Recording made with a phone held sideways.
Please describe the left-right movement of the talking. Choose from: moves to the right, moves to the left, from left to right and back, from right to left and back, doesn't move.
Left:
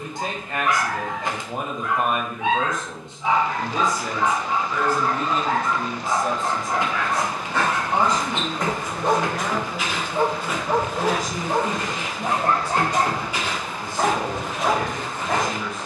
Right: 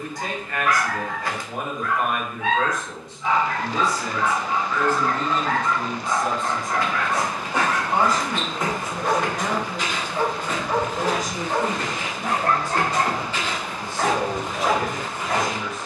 moves to the right.